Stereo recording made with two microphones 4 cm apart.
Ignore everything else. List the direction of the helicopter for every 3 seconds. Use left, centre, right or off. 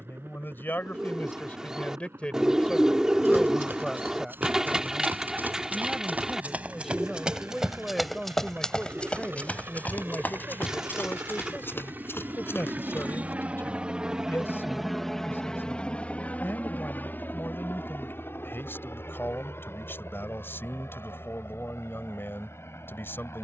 right, right, right, right, right, left, left, left.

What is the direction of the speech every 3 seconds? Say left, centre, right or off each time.
left, centre, centre, left, left, left, left, left.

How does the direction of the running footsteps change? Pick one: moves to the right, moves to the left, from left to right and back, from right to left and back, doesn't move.
moves to the left.